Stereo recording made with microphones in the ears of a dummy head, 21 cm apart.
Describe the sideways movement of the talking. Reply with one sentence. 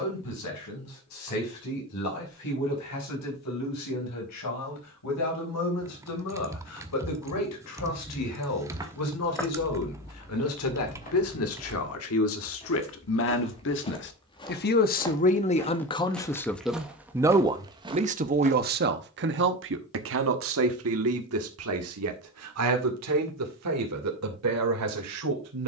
You can hear the talking move to the right.